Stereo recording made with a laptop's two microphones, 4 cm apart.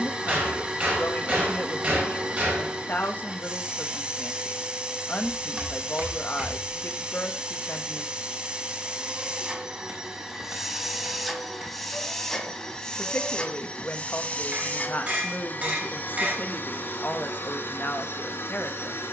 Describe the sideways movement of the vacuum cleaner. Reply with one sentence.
You can hear the vacuum cleaner go from the right side to the left.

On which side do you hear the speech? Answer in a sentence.
In this clip you hear the speech on the left.